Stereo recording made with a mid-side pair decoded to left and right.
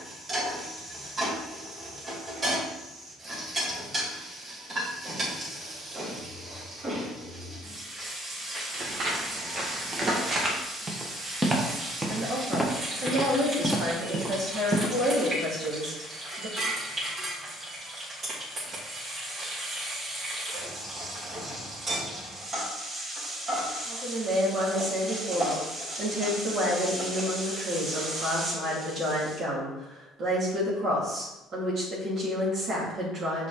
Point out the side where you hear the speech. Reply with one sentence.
In this clip you hear the speech on the right.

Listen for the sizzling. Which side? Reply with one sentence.
In this clip you hear the sizzling on the right.